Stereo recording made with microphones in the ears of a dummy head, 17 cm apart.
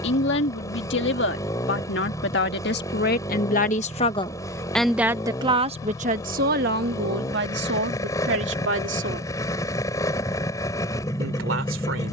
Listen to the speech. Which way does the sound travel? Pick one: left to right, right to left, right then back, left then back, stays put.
left to right.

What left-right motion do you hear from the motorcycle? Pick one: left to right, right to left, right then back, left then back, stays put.
stays put.